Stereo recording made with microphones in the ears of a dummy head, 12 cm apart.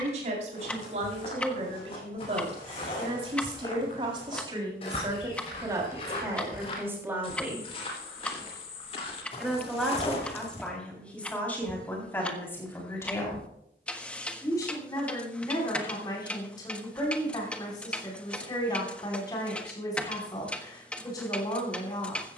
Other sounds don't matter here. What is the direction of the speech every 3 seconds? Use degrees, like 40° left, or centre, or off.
50° right, 30° right, 20° right, 10° left, 20° left, 30° left, 30° left, 30° left.